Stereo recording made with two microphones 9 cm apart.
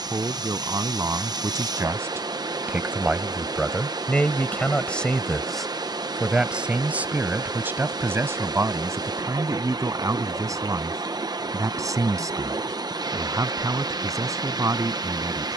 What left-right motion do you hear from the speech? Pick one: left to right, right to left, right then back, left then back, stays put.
left then back.